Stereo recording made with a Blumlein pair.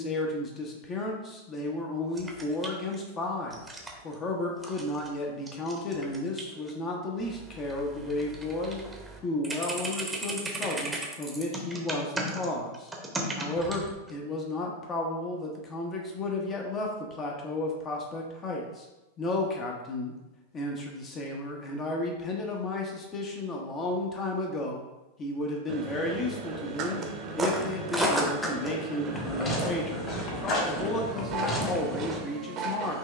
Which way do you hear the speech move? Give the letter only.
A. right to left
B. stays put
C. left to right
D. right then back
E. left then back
B.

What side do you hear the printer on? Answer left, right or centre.
right.